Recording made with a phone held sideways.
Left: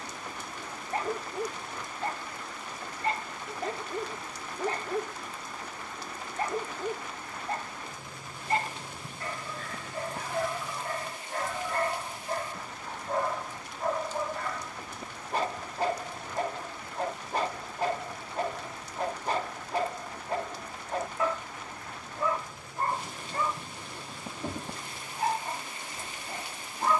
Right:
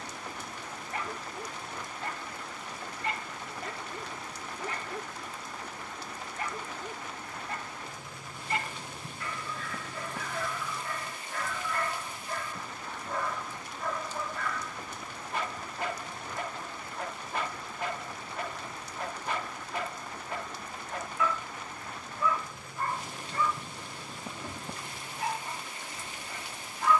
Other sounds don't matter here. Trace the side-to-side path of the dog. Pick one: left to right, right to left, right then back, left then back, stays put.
stays put.